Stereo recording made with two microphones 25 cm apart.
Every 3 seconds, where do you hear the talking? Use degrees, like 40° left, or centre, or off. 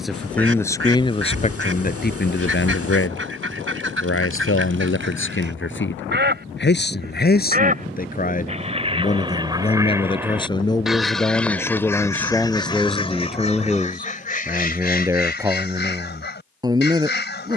30° left, 50° left, 40° left, 20° left, centre, 10° right.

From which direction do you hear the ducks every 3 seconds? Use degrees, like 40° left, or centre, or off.
50° right, 50° right, 30° right, 10° right, 30° left, 40° left.